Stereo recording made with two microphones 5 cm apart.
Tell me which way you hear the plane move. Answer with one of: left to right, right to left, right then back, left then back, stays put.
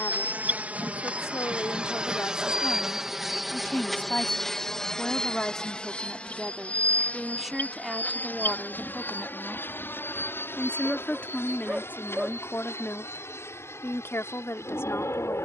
right to left.